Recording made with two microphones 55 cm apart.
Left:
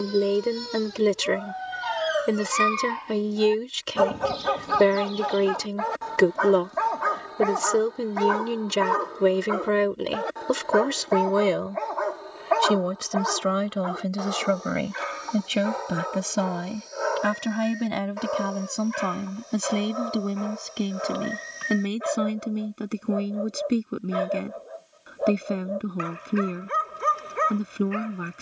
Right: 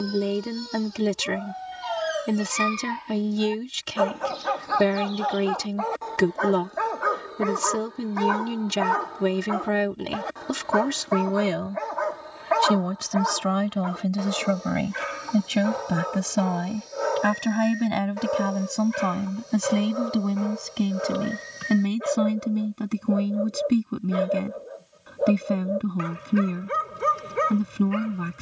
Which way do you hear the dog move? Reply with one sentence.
In this clip you hear the dog move to the right.